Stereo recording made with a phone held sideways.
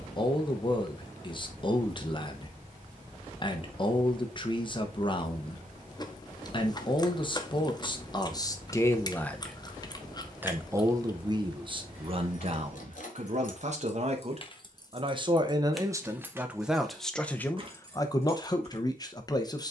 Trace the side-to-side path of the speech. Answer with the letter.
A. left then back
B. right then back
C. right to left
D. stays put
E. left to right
B.